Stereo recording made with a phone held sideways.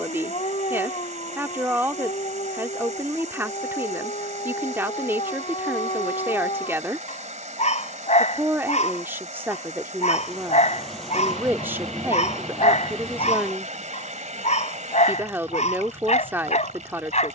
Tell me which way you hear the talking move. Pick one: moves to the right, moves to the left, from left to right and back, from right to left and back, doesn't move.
doesn't move.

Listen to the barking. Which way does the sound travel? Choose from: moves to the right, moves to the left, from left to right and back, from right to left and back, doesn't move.
doesn't move.